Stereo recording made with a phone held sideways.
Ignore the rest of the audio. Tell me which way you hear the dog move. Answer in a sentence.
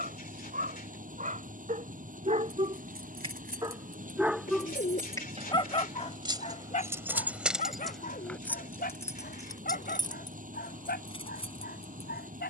In this clip you hear the dog travel towards the left.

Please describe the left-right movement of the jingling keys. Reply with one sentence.
You can hear the jingling keys go from the right side to the left.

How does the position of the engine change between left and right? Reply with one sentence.
You can hear the engine stay in one place.